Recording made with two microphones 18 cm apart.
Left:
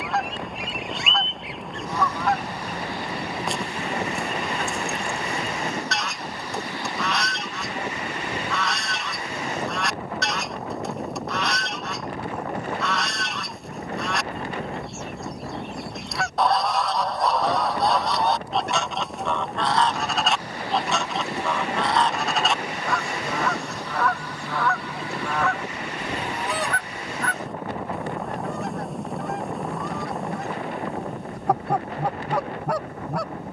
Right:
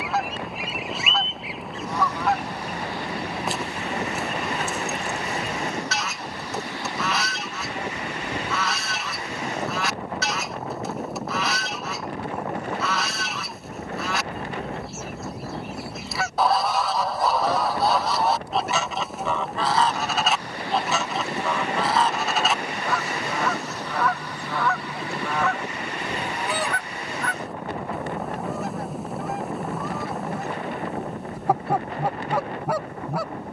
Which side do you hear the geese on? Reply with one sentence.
You can hear the geese in the centre.